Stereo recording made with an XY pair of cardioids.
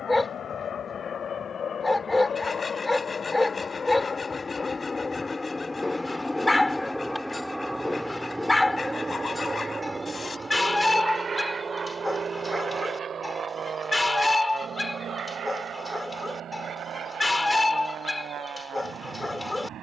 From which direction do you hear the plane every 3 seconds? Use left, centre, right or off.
left, left, centre, right, right, right, right.